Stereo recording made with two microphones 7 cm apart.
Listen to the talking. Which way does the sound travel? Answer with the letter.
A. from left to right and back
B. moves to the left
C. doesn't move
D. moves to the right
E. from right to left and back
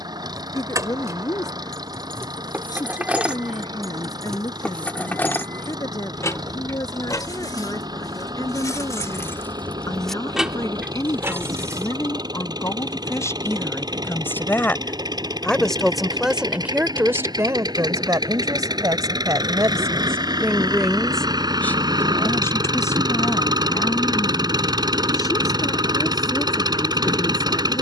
A.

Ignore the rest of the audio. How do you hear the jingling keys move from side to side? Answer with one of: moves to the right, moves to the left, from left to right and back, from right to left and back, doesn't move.
from right to left and back.